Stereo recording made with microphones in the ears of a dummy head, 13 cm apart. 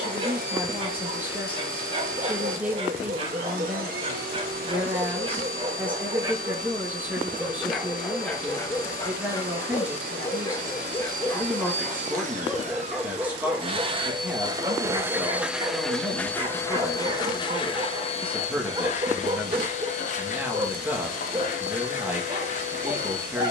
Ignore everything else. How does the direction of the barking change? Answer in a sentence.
You can hear the barking go left and come back.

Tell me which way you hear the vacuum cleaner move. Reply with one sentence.
You can hear the vacuum cleaner travel towards the left.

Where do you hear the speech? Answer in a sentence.
In this clip you hear the speech in the centre.